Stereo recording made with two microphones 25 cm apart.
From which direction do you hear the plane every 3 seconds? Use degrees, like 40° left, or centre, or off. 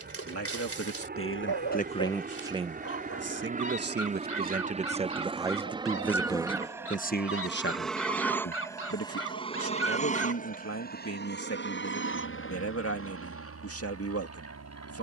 40° right, 30° right, centre, 30° left, 60° left.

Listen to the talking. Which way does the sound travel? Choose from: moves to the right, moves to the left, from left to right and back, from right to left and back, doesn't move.
from left to right and back.